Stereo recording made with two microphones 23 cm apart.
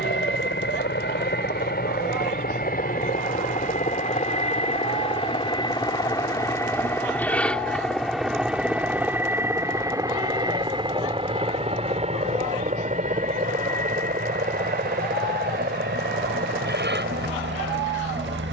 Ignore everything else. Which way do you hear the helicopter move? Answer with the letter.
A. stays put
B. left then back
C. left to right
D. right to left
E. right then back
C.